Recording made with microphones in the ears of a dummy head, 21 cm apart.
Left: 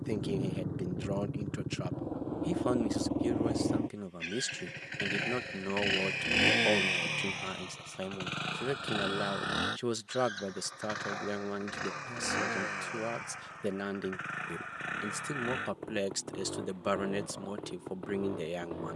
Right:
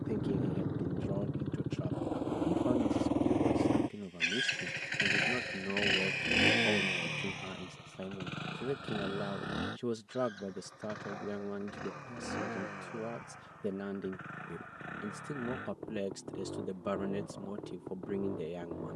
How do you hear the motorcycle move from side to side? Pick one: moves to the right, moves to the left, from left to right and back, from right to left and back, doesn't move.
moves to the left.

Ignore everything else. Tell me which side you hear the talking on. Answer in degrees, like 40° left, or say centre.
60° left.